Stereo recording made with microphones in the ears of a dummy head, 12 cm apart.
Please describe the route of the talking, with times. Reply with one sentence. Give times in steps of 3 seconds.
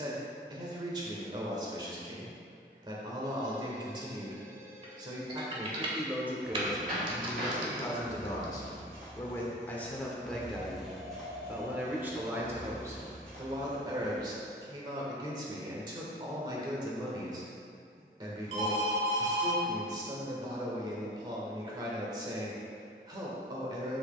In this clip you hear the talking on the right from 0 s, in the centre from 6 s and on the right from 12 s.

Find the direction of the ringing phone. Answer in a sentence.
In this clip you hear the ringing phone on the right.